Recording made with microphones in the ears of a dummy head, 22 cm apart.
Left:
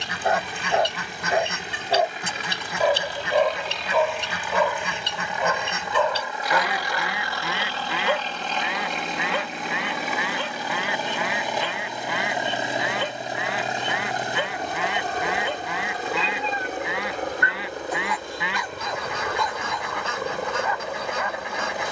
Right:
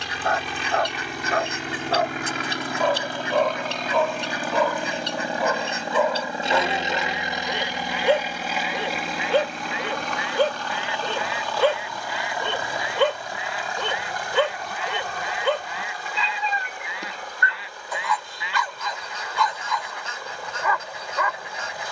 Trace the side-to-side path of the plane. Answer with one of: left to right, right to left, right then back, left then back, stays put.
right to left.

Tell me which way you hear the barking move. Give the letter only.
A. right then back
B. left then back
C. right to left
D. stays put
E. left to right
E.